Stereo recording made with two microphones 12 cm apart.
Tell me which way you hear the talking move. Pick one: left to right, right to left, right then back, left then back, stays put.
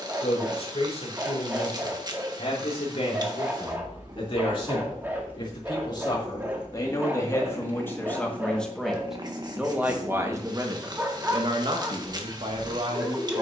left to right.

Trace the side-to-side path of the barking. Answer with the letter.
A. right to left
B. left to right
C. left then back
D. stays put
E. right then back
D.